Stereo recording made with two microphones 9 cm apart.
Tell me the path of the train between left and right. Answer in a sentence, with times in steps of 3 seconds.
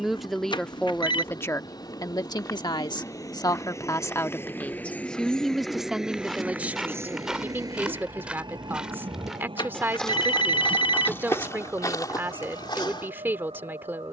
In this clip you hear the train on the left from 0 s and on the right from 6 s.